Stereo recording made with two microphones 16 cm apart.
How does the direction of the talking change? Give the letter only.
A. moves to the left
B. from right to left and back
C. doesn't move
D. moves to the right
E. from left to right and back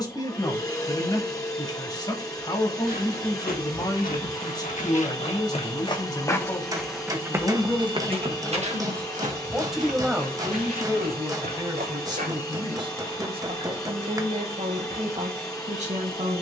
D.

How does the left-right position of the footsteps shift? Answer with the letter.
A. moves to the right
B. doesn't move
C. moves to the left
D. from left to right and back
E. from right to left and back
A.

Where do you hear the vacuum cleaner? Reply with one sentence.
In this clip you hear the vacuum cleaner on the left.